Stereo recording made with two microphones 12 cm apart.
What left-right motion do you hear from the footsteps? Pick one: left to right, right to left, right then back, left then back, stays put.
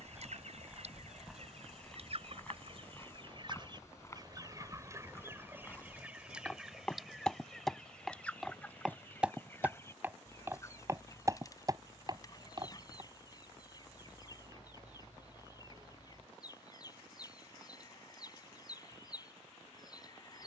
left then back.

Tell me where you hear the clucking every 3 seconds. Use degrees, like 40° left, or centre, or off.
60° right, 30° right, centre, 20° left, 30° left, 30° left, 30° left.